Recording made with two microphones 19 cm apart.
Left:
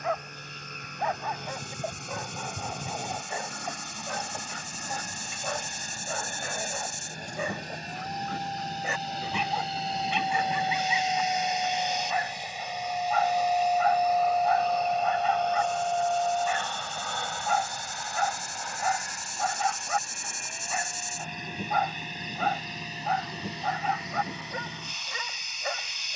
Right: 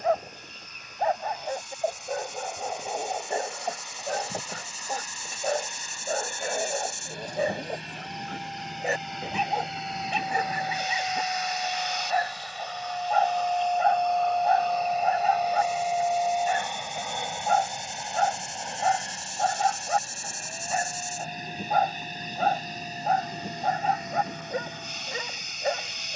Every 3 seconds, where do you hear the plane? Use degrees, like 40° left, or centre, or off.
70° left, 60° left, 50° left, 30° left, 10° left, 10° right, 30° right, 40° right, 50° right.